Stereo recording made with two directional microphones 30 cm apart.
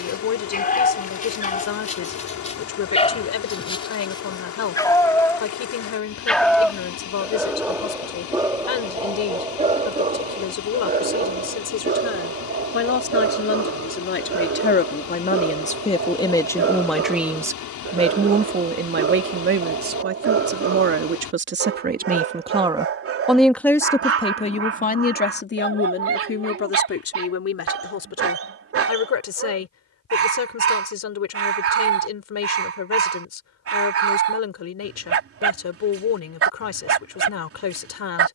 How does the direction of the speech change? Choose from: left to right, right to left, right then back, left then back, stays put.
right then back.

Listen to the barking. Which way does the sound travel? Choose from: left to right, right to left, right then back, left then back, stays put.
left to right.